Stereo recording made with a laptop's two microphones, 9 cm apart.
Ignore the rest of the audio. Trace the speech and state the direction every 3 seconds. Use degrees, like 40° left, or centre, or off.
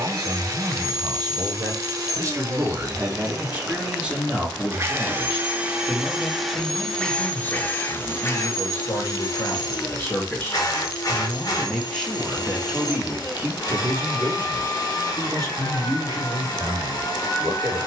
40° right, 10° right, 20° left, 20° left, 20° right, 50° right.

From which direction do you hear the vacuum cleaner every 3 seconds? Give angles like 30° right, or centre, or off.
40° right, 30° right, 20° left, 40° left, 50° left, 50° left.